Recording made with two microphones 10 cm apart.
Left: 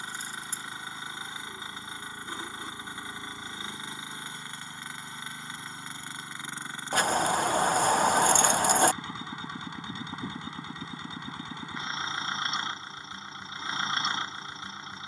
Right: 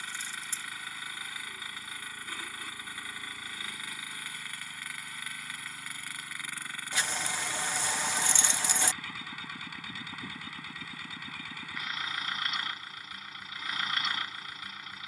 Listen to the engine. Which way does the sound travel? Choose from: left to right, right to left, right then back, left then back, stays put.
stays put.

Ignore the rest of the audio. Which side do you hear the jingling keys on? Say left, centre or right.
left.